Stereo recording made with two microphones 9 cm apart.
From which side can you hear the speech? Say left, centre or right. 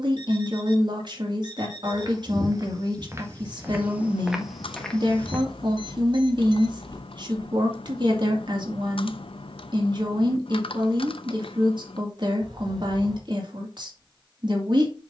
right.